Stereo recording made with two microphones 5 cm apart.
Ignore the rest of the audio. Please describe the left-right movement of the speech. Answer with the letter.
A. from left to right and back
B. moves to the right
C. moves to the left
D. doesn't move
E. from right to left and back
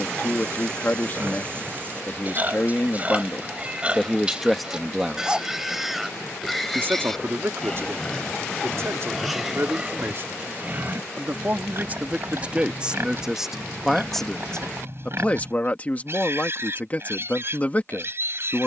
A.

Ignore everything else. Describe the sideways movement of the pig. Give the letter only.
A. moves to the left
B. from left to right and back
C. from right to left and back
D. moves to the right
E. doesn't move
C.